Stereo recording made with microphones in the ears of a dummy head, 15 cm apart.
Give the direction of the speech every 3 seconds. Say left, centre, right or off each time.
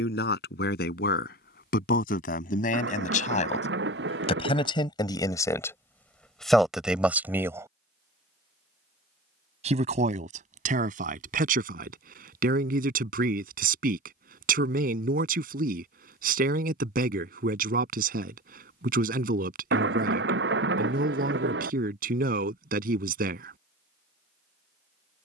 left, left, centre, right, right, right, right, right, off.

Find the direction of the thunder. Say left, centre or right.
right.